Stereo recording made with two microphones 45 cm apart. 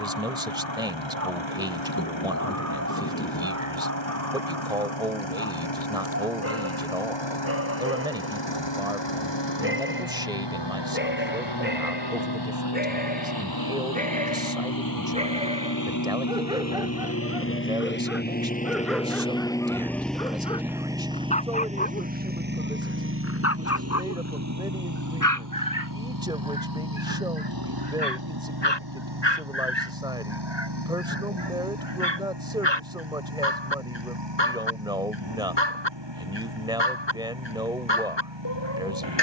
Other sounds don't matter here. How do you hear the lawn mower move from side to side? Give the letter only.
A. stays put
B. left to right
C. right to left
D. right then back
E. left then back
B.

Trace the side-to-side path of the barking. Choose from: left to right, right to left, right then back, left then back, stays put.
right to left.